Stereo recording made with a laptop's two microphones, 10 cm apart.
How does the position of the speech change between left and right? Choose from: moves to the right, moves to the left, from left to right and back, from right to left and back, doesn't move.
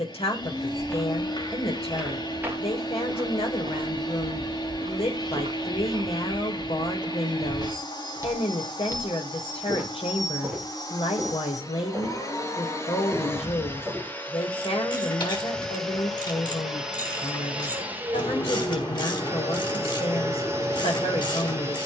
doesn't move.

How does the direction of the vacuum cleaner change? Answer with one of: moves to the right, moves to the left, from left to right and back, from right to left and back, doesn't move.
moves to the right.